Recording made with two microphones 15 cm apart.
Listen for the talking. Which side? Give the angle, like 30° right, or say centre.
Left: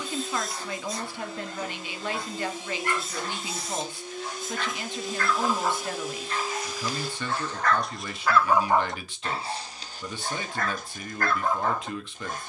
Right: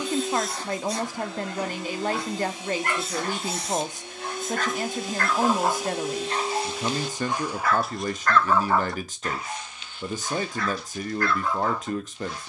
40° right.